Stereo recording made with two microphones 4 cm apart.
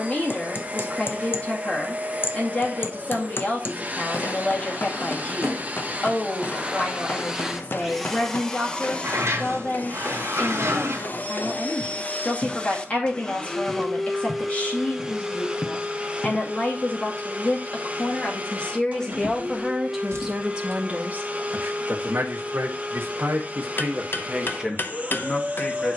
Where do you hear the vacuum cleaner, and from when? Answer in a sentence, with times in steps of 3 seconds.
You can hear the vacuum cleaner on the right from 0 s, in the centre from 6 s, on the left from 9 s, in the centre from 12 s and on the right from 15 s.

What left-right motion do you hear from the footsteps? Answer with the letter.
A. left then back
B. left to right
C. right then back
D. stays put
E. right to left
E.